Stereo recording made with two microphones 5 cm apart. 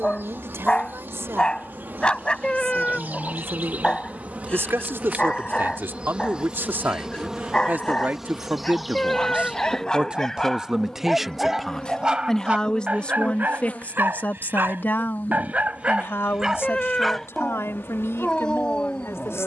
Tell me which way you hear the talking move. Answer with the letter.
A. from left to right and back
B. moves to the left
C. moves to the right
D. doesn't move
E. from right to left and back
B.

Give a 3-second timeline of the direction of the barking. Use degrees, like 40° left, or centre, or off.
20° left, 20° left, 20° left, 10° left, 40° right, 10° right, 20° left.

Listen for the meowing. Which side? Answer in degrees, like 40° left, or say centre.
20° left.